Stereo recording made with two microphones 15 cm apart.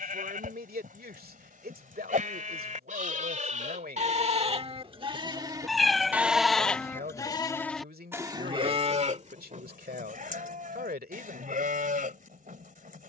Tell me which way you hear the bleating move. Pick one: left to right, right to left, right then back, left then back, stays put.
left then back.